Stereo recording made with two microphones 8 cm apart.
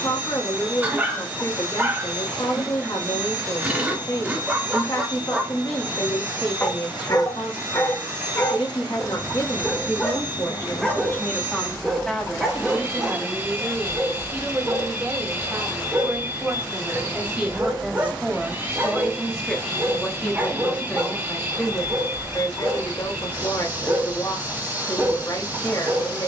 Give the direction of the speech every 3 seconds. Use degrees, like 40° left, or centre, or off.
60° left, 60° left, 60° left, 40° left, 10° right, 20° right, 10° left, 40° left, 50° left.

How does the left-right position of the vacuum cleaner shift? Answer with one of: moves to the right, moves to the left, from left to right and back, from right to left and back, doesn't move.
doesn't move.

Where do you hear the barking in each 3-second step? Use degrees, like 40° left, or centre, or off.
20° right, 20° right, 40° left, 10° left, 10° right, 20° right, 20° right, 20° right, 20° right.